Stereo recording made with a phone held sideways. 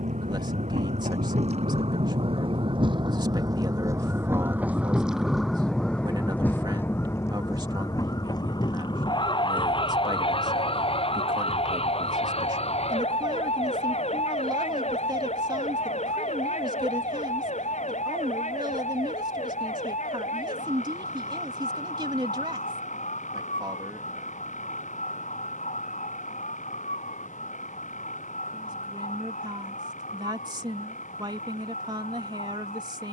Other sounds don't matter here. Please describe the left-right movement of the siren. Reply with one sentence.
In this clip you hear the siren travel towards the left.